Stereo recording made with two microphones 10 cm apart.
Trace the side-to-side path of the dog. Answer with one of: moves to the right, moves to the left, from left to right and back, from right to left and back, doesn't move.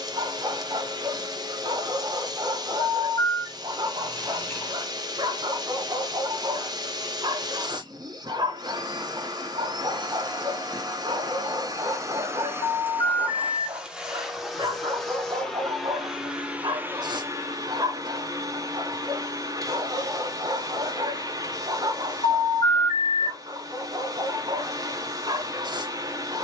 doesn't move.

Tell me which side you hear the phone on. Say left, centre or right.
left.